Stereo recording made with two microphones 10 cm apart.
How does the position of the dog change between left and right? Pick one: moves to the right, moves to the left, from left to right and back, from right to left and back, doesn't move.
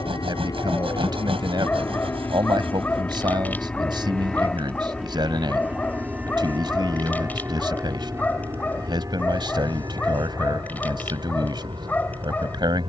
doesn't move.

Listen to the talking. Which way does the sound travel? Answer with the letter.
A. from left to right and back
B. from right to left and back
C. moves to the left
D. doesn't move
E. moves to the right
D.